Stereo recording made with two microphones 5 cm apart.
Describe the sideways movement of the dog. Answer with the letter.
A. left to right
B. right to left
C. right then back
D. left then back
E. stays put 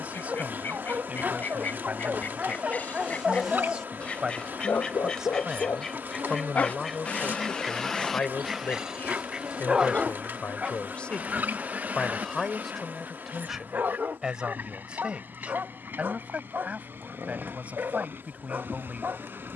D.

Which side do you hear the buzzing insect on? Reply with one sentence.
In this clip you hear the buzzing insect on the right.